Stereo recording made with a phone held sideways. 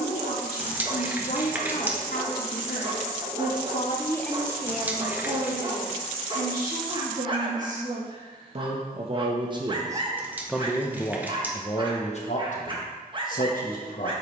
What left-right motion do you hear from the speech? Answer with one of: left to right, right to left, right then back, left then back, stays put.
right then back.